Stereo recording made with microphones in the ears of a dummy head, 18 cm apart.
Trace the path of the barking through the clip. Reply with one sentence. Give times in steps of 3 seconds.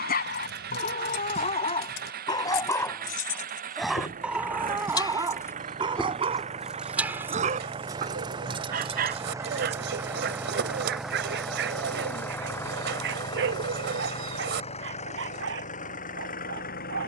In this clip you hear the barking on the left from 0 s, in the centre from 3 s and on the right from 6 s.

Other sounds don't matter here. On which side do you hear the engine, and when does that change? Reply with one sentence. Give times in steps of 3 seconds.
In this clip you hear the engine on the right from 0 s, in the centre from 9 s and on the left from 12 s.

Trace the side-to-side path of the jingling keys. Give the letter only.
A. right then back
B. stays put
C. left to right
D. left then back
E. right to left
C.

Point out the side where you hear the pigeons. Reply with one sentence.
You can hear the pigeons on the right.